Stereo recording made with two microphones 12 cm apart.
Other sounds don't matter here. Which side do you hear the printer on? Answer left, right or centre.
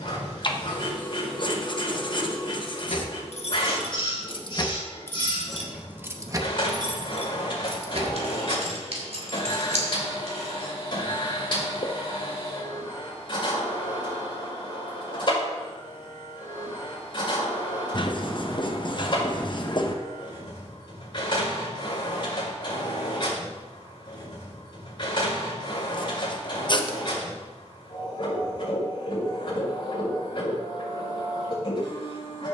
left.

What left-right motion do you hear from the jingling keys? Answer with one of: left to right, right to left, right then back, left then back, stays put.
left to right.